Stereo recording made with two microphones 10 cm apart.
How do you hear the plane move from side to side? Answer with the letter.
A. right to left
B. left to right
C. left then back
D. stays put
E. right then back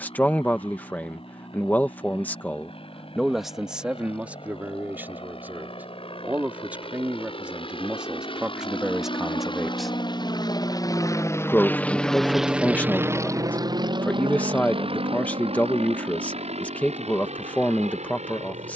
B.